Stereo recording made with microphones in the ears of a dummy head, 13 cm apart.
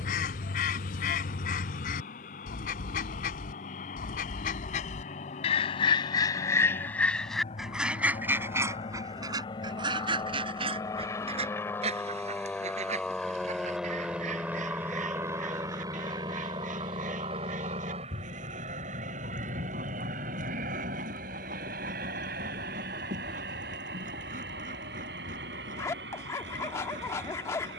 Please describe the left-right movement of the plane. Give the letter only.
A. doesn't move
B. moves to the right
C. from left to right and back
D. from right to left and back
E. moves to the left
B.